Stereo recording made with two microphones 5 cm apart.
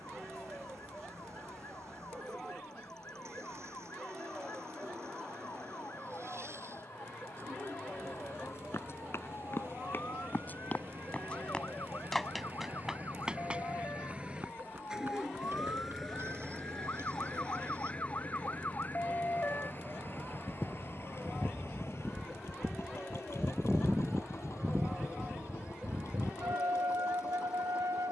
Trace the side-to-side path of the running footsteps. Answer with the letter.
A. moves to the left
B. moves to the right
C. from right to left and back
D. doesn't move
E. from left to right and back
B.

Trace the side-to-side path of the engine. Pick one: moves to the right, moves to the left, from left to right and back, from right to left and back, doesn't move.
moves to the left.